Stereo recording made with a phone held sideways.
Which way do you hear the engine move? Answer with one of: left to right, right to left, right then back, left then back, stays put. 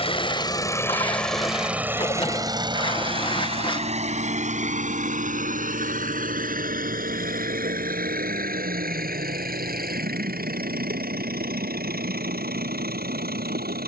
left to right.